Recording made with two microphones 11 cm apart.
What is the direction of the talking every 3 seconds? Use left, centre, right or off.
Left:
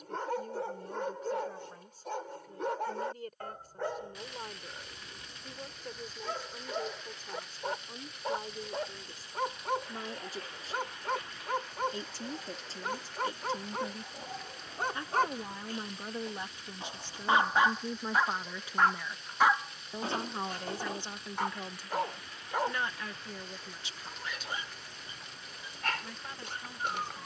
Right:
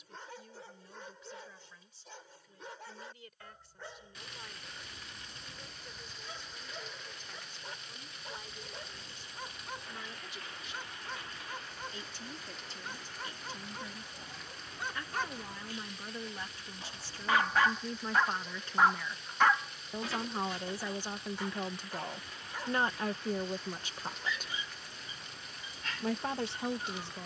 left, left, left, left, left, left, centre, right, right.